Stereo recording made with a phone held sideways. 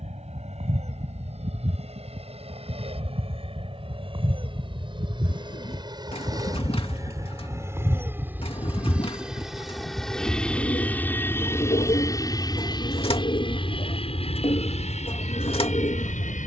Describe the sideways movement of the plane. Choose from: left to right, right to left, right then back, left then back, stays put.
right to left.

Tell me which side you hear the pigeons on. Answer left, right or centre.
left.